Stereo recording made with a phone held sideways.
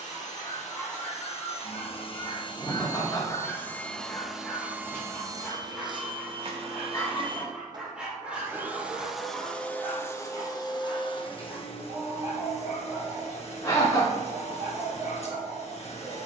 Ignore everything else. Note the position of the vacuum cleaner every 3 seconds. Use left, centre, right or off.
left, centre, right, left, left, left.